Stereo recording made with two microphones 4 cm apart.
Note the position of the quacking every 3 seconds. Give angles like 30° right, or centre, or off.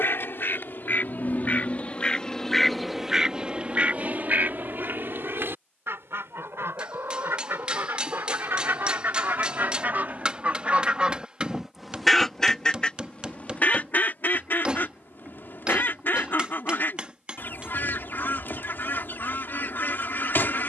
40° left, 40° right, 60° right, 30° right, 30° left, 50° left, 50° left.